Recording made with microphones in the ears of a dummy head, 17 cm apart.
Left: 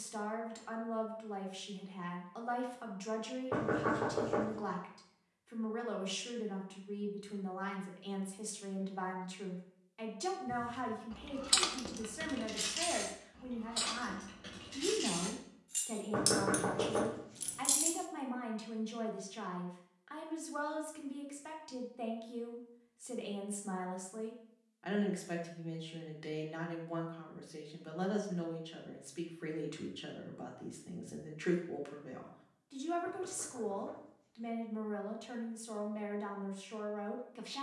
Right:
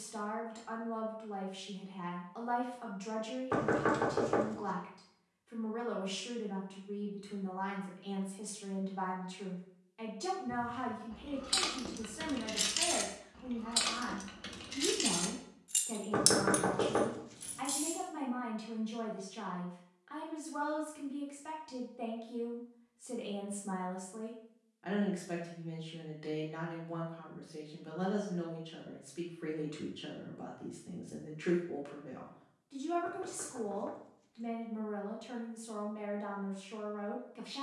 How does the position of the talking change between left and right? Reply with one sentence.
You can hear the talking stay put.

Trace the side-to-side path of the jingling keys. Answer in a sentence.
You can hear the jingling keys go right and come back.